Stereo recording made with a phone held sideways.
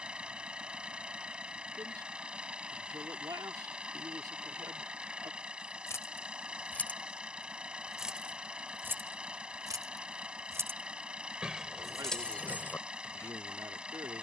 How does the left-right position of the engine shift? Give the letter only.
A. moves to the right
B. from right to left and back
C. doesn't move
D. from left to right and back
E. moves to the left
C.